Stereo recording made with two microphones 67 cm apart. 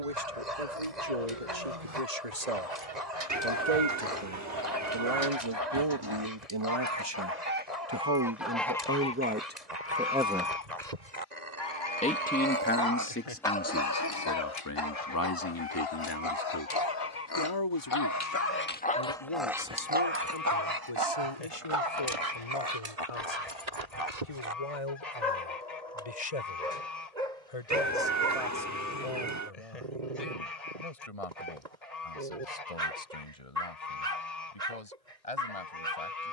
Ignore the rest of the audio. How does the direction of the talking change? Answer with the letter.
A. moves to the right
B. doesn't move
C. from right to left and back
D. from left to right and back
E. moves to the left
E.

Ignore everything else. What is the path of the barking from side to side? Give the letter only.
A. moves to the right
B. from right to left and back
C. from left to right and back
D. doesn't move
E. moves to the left
B.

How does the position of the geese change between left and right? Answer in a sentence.
In this clip you hear the geese move to the left.